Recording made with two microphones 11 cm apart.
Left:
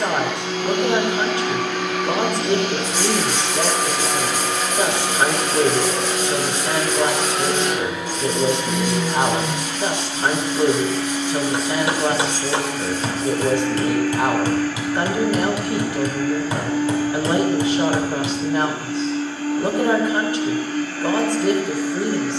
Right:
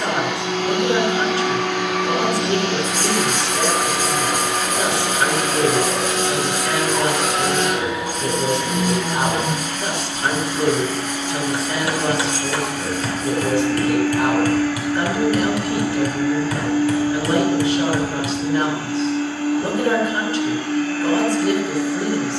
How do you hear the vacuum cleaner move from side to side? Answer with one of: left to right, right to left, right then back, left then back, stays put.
stays put.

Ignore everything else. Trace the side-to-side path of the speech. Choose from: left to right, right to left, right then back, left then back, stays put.
stays put.